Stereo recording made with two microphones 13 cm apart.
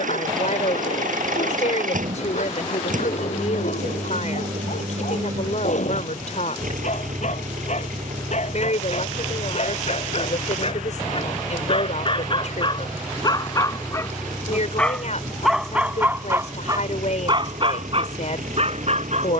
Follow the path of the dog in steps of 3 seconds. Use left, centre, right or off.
left, left, left, left, left, right, right.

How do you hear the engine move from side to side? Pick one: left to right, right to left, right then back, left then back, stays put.
stays put.